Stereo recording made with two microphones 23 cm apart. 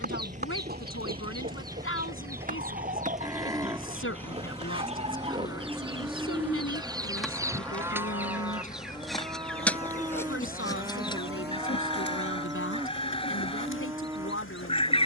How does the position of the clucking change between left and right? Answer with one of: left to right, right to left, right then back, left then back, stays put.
right to left.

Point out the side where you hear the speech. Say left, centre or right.
left.